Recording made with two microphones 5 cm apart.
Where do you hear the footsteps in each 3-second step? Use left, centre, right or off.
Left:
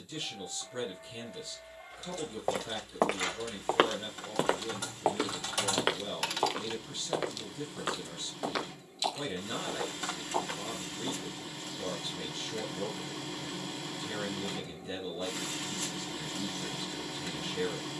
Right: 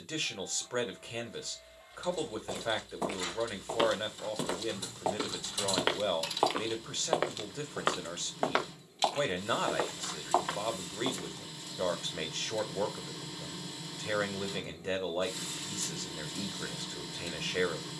left, left, right, right, off, off.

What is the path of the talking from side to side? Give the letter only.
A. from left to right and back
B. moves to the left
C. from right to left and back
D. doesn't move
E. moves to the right
D.